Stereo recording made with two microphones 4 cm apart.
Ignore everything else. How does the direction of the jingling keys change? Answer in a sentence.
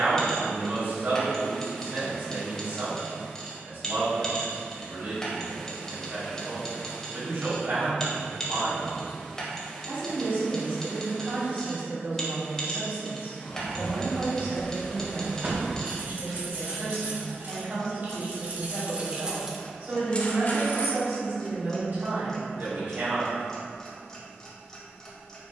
You can hear the jingling keys move from left to right and back again.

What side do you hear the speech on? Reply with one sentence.
In this clip you hear the speech on the right.